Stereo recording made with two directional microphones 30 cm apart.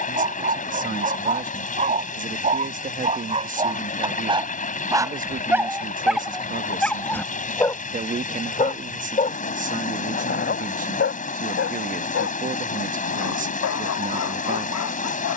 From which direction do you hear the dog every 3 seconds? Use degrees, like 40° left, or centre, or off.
20° right, 10° right, 10° left, 30° left, 50° left.